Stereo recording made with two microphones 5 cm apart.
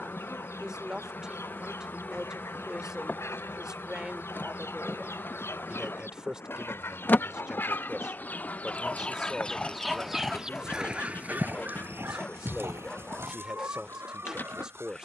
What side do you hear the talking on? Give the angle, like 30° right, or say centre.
20° right.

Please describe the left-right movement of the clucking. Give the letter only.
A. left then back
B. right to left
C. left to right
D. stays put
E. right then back
C.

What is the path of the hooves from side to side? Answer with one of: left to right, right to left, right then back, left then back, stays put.
left to right.